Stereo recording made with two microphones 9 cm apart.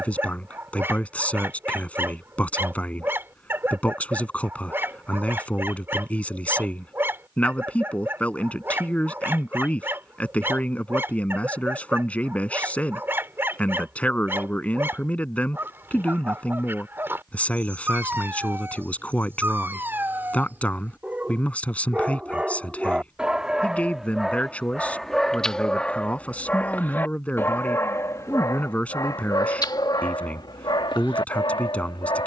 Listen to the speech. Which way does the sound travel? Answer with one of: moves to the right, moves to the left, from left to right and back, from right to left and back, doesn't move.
doesn't move.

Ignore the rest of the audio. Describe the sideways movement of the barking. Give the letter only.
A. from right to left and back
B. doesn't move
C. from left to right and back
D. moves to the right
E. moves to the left
E.